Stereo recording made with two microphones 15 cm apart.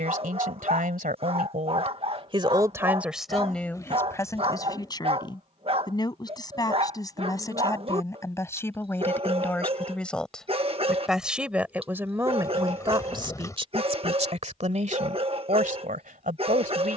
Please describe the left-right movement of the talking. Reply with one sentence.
In this clip you hear the talking go left and come back.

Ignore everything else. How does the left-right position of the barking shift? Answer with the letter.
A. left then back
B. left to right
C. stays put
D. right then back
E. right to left
C.